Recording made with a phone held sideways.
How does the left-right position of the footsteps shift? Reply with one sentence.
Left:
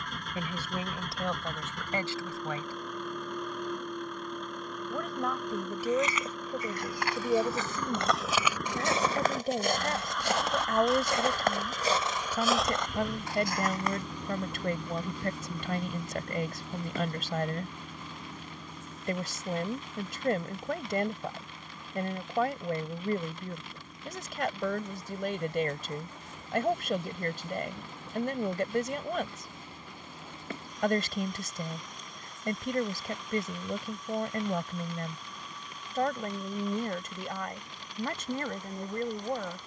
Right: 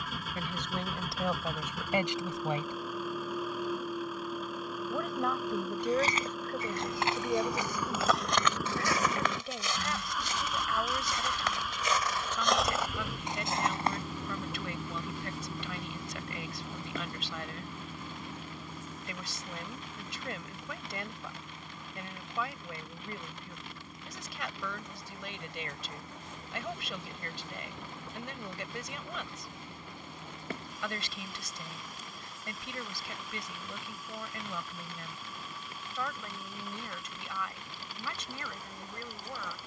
In this clip you hear the footsteps go left and come back.